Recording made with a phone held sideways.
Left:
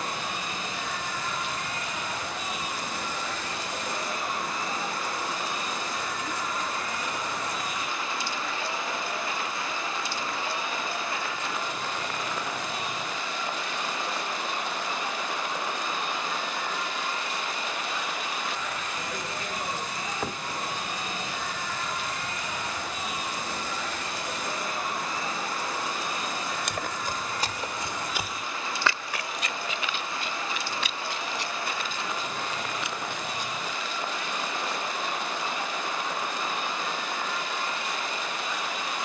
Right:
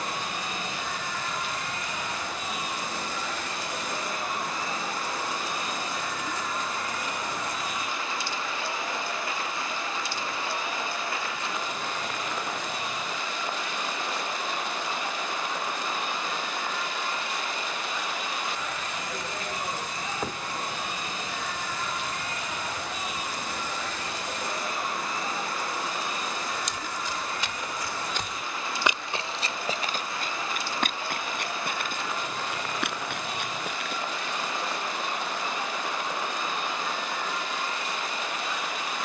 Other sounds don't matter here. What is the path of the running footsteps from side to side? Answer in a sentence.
You can hear the running footsteps travel towards the right.